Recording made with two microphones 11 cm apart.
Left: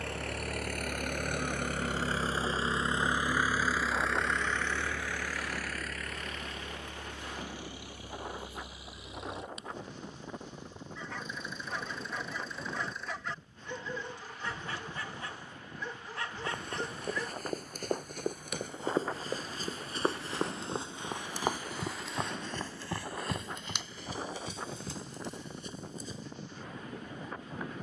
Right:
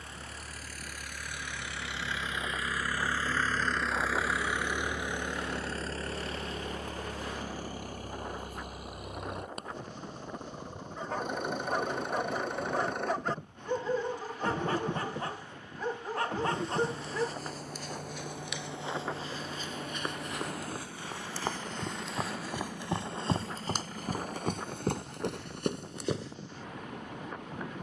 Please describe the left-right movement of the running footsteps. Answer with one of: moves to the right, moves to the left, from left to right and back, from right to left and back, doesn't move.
moves to the right.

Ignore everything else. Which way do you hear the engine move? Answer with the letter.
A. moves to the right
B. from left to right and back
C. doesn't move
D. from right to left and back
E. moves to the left
A.